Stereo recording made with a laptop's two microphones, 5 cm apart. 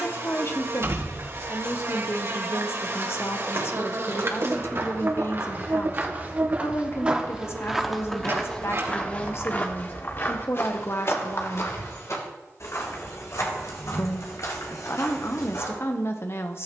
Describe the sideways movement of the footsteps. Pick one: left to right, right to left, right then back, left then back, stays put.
right to left.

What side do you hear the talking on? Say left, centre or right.
left.